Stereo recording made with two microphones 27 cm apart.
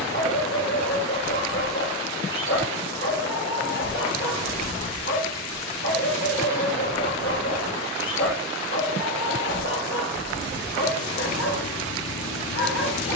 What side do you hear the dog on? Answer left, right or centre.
left.